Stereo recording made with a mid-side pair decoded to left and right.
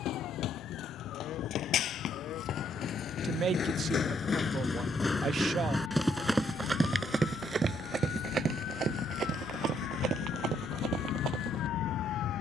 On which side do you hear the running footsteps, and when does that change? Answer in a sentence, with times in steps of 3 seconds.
In this clip you hear the running footsteps on the left from 0 s and on the right from 6 s.